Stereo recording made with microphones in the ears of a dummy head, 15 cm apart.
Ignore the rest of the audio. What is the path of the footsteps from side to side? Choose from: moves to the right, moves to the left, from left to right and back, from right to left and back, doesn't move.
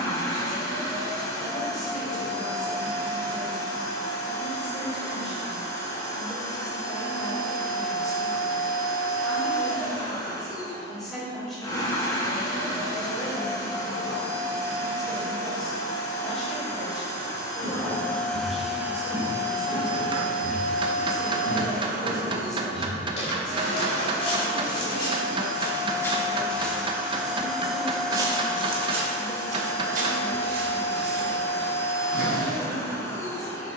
from right to left and back.